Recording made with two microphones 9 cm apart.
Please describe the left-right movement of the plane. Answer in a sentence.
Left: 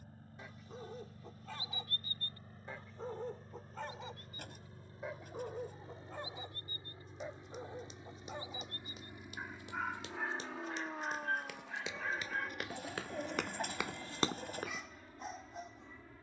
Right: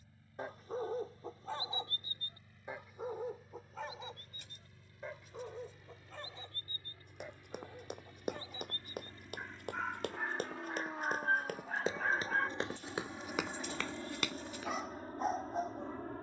In this clip you hear the plane go from the left side to the right.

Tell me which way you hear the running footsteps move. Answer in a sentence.
You can hear the running footsteps move from right to left.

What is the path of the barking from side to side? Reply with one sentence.
In this clip you hear the barking go left and come back.